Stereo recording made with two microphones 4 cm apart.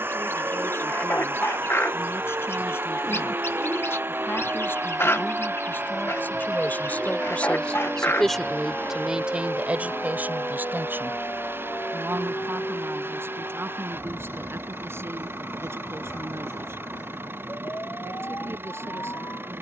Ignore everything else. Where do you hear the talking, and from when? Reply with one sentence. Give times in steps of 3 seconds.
In this clip you hear the talking on the left from 0 s and on the right from 9 s.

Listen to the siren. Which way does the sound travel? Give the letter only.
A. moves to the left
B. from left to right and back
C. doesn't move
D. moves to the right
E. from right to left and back
A.